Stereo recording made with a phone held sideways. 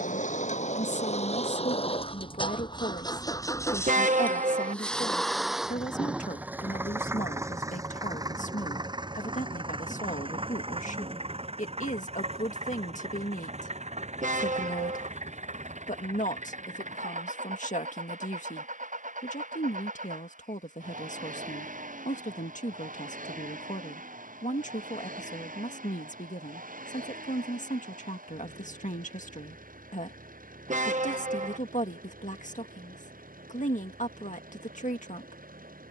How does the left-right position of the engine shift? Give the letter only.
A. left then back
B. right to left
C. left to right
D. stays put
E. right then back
C.